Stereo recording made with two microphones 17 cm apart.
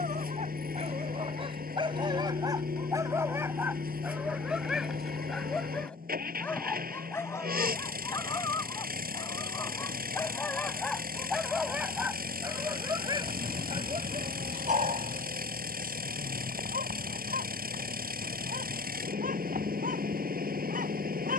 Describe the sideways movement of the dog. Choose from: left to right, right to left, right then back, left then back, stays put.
left then back.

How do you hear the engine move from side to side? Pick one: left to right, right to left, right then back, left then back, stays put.
stays put.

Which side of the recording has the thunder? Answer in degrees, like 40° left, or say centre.
30° right.